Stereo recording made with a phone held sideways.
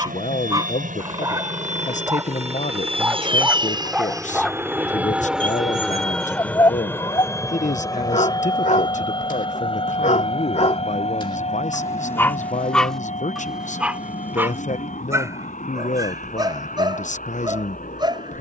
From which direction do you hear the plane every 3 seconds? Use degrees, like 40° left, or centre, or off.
50° right, 20° right, 20° left, 30° left, 40° left, 50° left.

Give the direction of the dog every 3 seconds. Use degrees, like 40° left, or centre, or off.
20° right, centre, 30° left, 40° left, centre, 20° right.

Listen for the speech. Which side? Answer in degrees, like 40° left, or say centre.
50° left.